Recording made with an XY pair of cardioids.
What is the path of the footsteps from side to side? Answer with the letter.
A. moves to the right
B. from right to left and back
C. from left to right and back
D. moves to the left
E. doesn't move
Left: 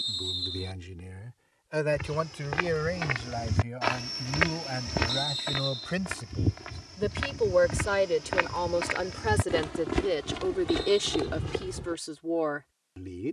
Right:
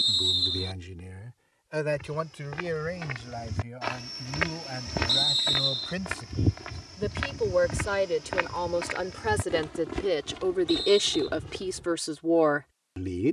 C.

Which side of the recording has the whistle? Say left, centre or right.
right.